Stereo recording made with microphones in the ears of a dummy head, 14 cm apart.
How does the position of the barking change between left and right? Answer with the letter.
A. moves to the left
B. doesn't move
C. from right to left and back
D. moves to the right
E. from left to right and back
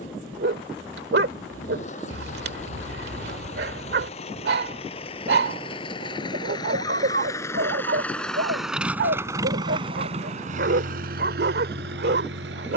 B.